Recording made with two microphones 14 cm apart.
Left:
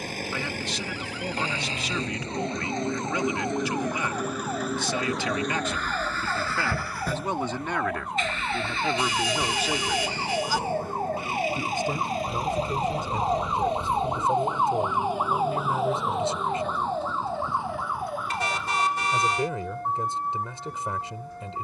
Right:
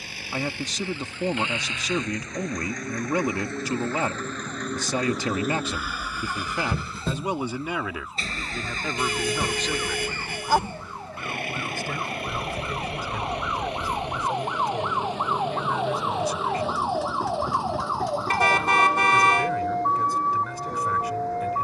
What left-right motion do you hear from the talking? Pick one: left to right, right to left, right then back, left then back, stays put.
right to left.